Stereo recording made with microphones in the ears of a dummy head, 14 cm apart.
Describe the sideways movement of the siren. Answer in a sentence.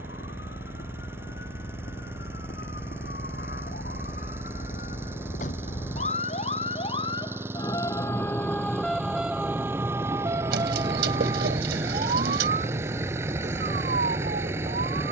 You can hear the siren travel towards the right.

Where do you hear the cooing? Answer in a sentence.
In this clip you hear the cooing on the right.